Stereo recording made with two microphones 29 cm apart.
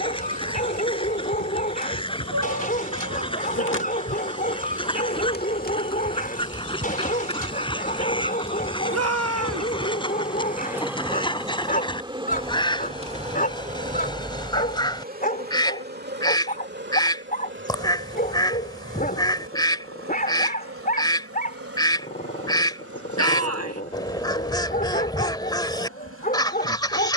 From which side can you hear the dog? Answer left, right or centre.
left.